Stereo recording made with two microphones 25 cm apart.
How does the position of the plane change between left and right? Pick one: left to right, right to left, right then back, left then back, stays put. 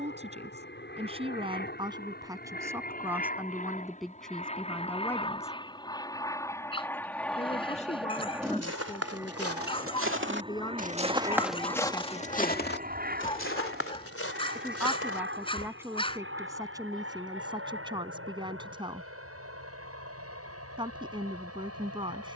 left to right.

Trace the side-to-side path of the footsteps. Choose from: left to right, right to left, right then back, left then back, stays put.
right to left.